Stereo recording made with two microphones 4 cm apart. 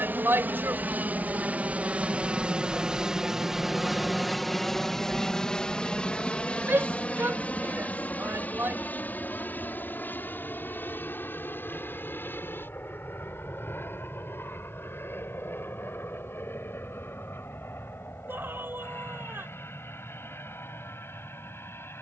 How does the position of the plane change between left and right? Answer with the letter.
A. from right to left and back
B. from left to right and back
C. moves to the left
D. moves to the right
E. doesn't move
C.